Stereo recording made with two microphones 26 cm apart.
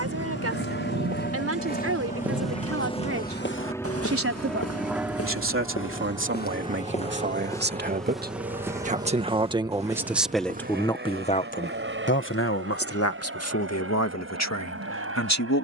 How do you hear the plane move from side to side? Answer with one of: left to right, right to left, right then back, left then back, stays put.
left to right.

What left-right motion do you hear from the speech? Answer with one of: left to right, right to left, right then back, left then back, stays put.
right to left.